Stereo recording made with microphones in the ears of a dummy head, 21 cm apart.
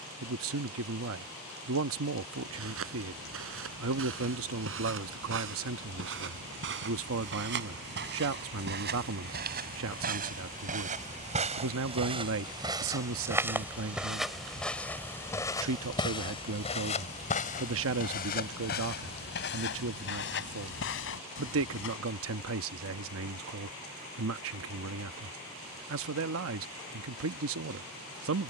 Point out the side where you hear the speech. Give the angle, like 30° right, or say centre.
60° right.